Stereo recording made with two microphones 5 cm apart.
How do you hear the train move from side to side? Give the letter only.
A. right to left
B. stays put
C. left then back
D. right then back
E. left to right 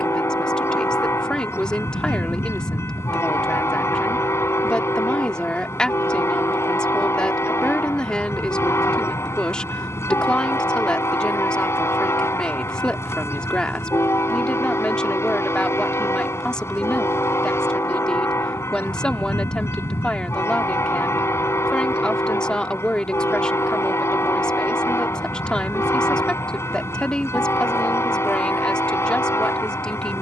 B.